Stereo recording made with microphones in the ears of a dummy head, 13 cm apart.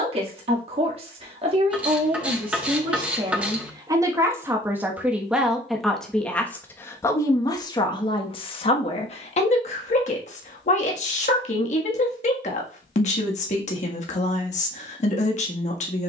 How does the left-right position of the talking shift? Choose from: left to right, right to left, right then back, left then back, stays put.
right to left.